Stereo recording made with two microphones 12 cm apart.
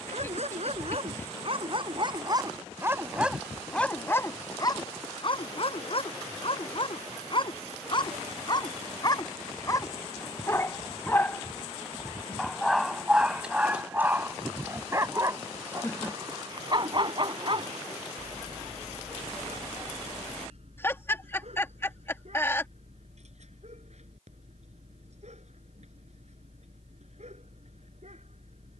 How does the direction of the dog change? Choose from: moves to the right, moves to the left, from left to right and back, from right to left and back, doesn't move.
from right to left and back.